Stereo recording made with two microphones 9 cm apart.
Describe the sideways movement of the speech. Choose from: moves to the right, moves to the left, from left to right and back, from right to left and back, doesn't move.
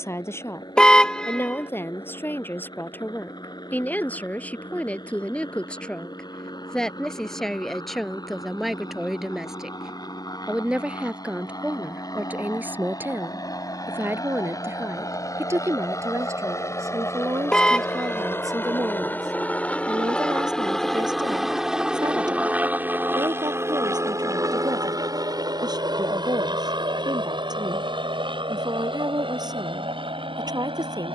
moves to the right.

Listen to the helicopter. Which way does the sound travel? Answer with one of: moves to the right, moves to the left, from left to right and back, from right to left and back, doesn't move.
moves to the right.